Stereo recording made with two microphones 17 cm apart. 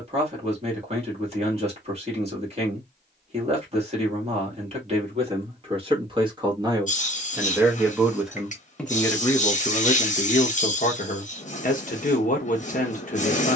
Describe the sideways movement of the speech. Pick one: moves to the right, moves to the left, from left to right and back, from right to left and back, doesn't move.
moves to the left.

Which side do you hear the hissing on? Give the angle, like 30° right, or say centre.
40° left.